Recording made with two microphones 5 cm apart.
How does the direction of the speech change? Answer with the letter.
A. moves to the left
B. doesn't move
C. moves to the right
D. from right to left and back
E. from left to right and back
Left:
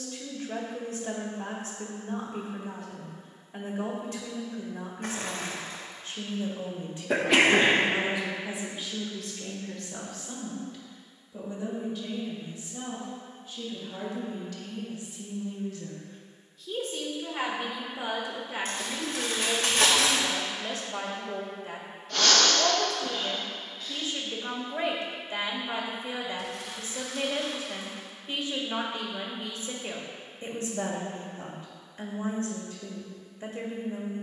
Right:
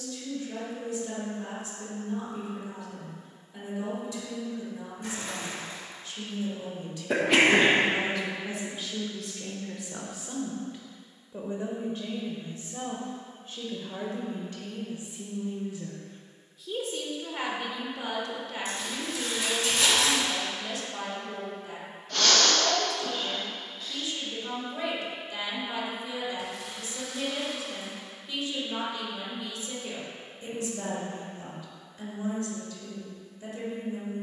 E.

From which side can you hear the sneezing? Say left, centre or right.
centre.